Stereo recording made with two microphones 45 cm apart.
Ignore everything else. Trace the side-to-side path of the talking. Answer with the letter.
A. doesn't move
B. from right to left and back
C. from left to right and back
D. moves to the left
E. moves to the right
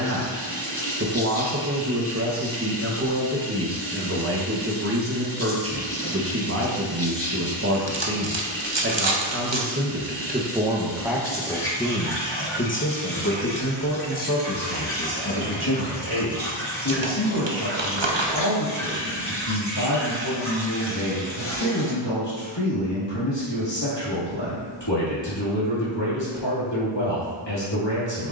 D.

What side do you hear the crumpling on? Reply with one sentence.
You can hear the crumpling on the right.